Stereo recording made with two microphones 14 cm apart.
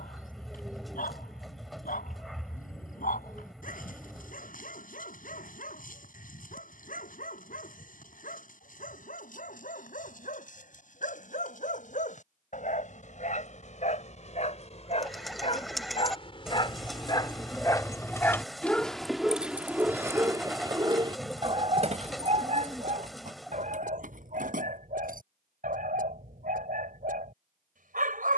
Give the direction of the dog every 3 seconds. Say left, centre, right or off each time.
left, left, left, left, left, left, centre, right, right, right.